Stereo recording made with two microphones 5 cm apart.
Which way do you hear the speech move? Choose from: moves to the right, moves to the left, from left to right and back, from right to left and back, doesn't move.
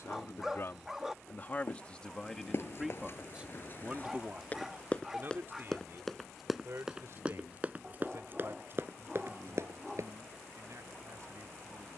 moves to the right.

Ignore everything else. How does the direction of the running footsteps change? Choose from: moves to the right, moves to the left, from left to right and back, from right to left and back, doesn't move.
moves to the right.